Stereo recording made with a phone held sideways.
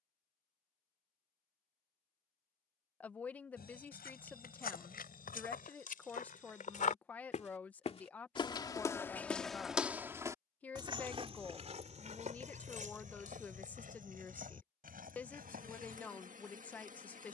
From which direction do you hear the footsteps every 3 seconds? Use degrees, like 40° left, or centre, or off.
off, 70° left, 50° left, 20° right, 60° right, 70° right.